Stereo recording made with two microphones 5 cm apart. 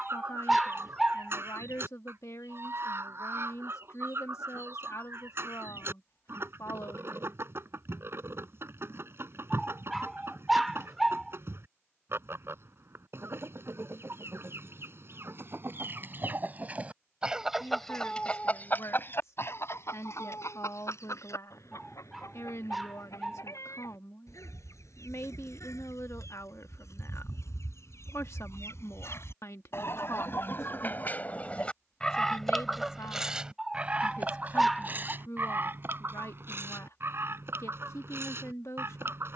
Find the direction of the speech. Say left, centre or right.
left.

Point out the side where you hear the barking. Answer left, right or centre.
centre.